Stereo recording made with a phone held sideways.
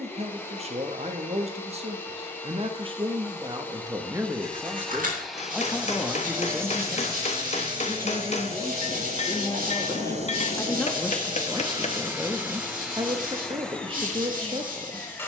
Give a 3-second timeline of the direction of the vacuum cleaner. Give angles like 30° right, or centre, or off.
10° left, 10° left, 30° right, 40° right, centre.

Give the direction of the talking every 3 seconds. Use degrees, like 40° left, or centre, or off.
50° right, 20° right, 20° left, 10° left, 30° right.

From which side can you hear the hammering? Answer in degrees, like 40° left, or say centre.
50° left.